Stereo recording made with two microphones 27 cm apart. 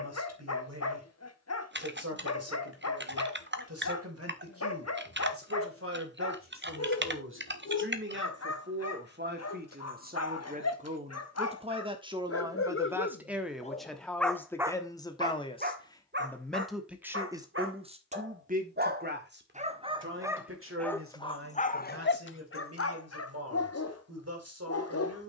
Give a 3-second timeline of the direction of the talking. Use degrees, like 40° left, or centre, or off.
60° right, 60° right, 50° right, 30° right, centre, centre, 40° right, 60° right, 60° right.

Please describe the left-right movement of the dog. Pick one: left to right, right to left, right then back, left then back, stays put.
right then back.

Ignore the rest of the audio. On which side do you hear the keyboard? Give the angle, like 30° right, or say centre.
40° right.